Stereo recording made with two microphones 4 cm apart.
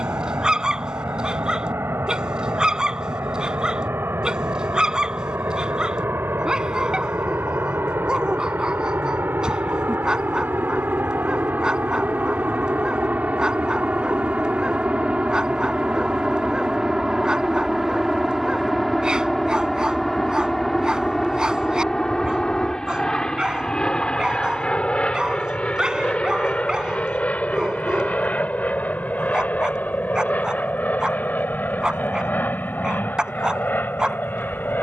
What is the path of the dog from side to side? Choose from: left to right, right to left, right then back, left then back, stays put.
stays put.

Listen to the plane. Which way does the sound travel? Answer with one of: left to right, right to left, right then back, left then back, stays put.
right to left.